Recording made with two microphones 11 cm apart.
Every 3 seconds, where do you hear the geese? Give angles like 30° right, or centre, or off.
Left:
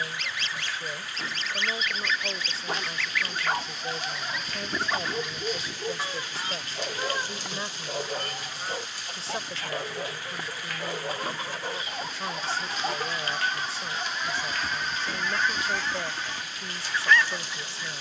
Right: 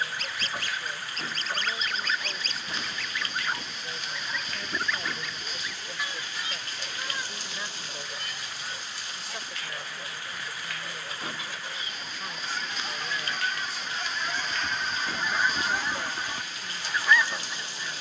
40° right, 10° left, 40° left, 50° left, 20° left, 10° right.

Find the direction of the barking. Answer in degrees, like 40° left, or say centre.
70° left.